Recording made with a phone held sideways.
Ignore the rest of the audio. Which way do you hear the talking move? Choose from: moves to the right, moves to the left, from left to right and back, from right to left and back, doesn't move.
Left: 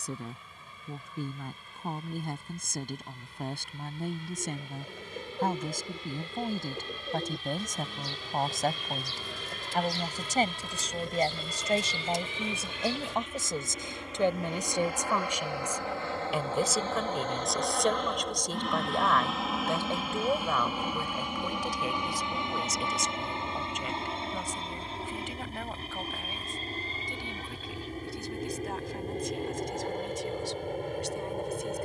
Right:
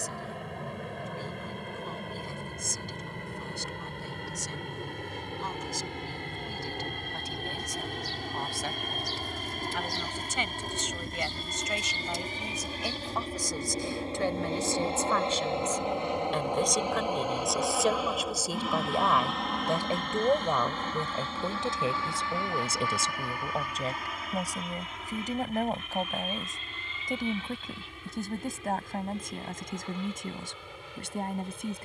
moves to the right.